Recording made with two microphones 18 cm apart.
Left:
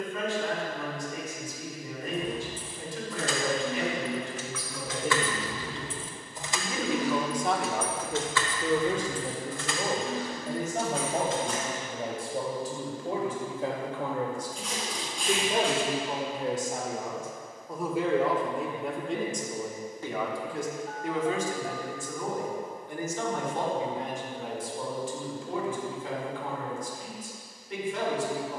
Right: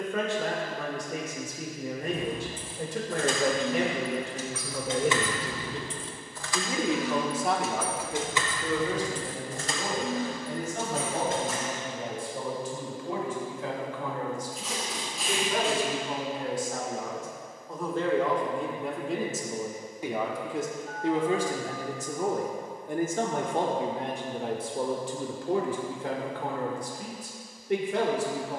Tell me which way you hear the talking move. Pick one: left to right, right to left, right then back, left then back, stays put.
left then back.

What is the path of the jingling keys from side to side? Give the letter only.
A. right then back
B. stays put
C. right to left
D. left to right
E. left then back
E.